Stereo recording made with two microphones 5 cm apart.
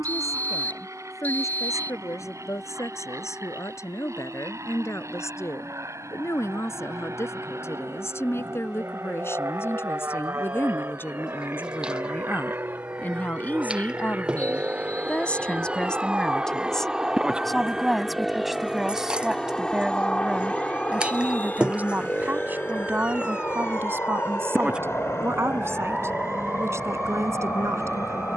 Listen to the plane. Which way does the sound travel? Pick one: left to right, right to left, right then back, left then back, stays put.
right to left.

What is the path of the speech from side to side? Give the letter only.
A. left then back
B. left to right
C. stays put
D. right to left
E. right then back
B.